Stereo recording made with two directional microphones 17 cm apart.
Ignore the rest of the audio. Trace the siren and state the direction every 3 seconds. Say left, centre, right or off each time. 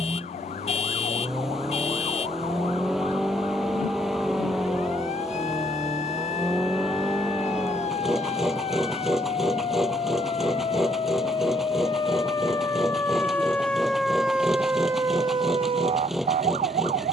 left, left, left, left, centre, right.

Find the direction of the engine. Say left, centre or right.
centre.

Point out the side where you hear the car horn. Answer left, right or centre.
left.